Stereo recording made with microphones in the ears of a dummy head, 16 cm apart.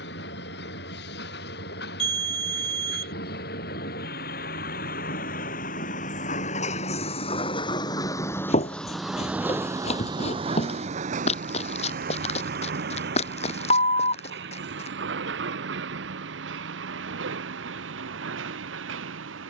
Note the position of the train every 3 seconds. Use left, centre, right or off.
left, left, left, right, right, right, right.